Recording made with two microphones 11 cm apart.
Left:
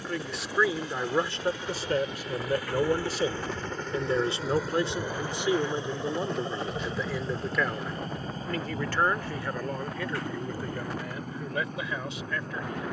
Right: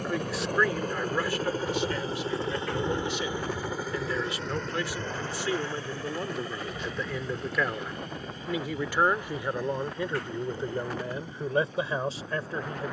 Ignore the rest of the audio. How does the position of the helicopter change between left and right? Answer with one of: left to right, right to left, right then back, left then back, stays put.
right to left.